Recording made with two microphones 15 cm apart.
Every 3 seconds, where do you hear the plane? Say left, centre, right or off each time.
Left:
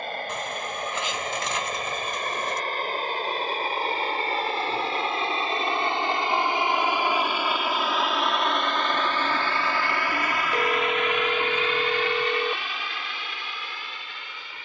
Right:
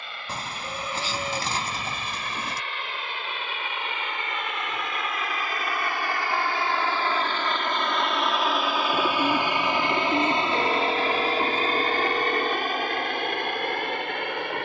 left, left, centre, right, right.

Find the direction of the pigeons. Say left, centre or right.
right.